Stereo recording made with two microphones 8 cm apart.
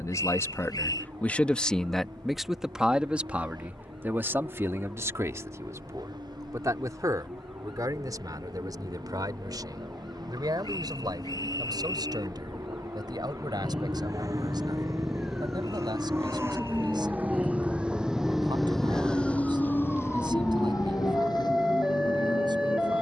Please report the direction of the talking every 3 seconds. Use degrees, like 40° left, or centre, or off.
10° left, 30° right, 40° right, 50° right, 50° right, 60° right, 60° right, 60° right.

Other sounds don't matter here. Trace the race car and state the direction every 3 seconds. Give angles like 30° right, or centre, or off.
60° right, 60° right, 60° right, 50° right, 50° right, 30° right, 20° left, 60° left.